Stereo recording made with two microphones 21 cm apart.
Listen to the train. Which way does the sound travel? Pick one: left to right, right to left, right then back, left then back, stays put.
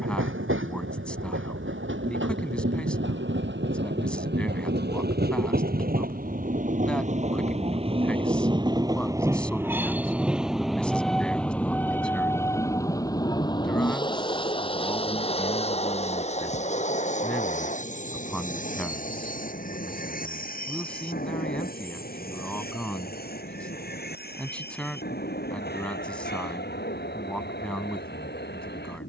right to left.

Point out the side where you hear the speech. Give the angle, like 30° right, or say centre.
centre.